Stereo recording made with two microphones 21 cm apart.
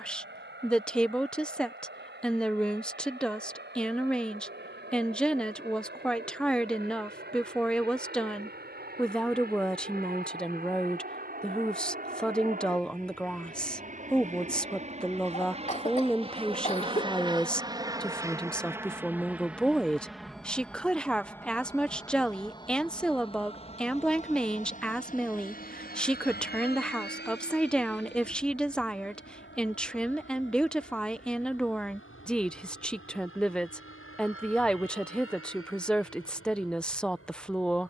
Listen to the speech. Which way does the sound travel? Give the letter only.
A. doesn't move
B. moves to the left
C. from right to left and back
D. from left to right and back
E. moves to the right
A.